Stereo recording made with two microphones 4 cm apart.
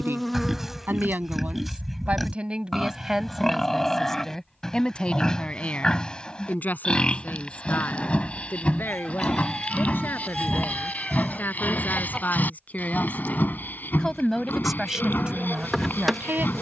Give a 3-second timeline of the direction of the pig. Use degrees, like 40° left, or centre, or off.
centre, 10° left, 30° left, 40° left, 50° left, 50° left.